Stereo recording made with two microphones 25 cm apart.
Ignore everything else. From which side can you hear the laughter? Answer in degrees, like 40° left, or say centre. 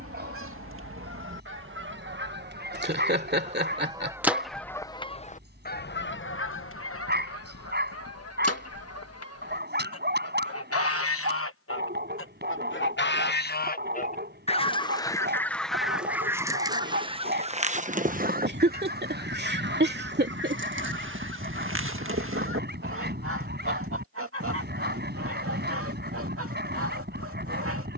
40° right.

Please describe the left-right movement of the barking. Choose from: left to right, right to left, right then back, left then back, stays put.
stays put.